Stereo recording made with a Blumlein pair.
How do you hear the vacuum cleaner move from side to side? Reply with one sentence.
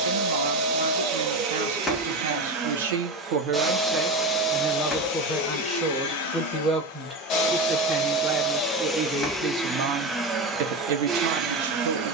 You can hear the vacuum cleaner move from right to left and back again.